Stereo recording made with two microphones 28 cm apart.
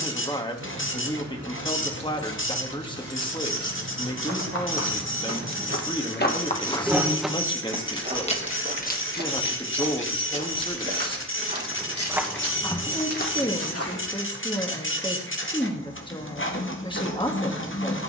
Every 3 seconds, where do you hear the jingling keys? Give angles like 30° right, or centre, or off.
70° right, 50° right, 10° left, 50° left, 60° left, off.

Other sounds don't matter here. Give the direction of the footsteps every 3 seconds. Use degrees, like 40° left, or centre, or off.
off, 60° left, 10° right, 40° right, 30° left, off.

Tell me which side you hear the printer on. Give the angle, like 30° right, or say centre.
50° left.